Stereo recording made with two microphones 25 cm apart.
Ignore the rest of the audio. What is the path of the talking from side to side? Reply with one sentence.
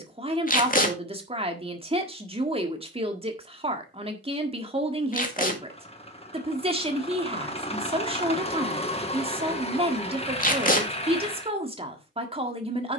In this clip you hear the talking stay put.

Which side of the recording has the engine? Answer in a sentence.
In this clip you hear the engine on the left.